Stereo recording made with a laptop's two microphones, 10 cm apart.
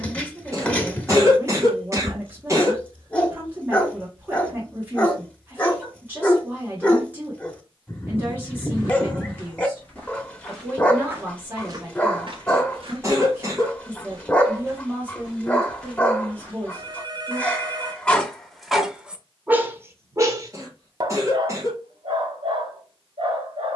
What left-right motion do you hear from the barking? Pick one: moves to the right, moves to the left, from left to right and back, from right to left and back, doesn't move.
moves to the right.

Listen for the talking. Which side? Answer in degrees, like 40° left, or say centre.
20° right.